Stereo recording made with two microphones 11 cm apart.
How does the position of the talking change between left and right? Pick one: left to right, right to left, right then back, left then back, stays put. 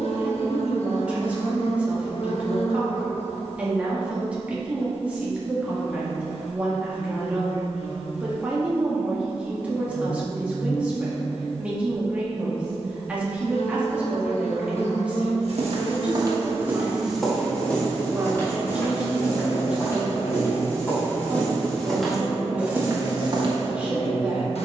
stays put.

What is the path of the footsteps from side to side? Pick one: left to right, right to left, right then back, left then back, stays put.
left then back.